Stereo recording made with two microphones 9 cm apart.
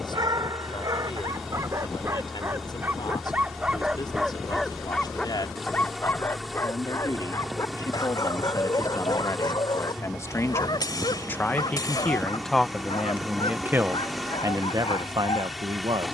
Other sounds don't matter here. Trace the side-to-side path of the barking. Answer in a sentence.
You can hear the barking move to the left.